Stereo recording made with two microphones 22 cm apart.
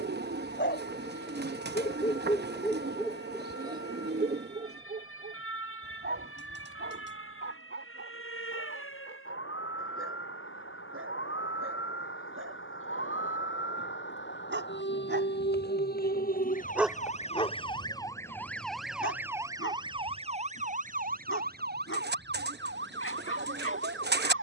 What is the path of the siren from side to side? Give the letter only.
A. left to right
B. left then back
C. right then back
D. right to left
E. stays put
A.